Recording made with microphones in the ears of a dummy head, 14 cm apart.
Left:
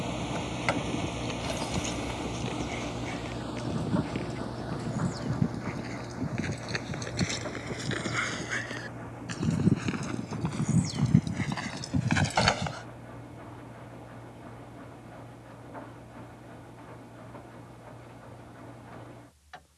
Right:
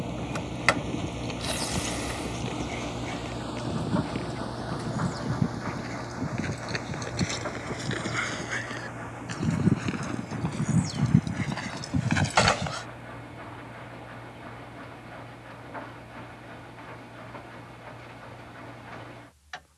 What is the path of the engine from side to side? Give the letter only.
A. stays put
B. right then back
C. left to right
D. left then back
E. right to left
C.